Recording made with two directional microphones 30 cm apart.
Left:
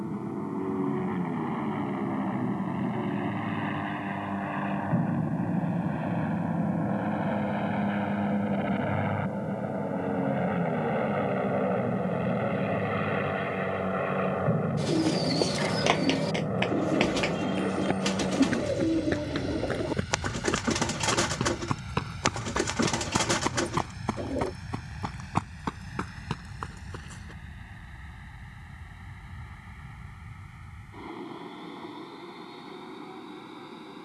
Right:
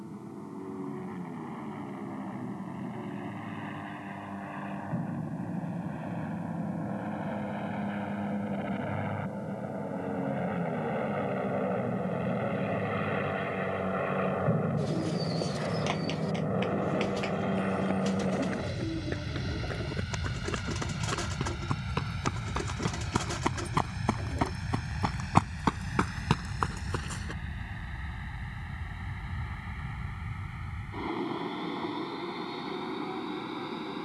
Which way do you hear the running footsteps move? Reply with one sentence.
In this clip you hear the running footsteps move to the right.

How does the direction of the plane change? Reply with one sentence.
You can hear the plane move to the right.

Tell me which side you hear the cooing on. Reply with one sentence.
You can hear the cooing on the left.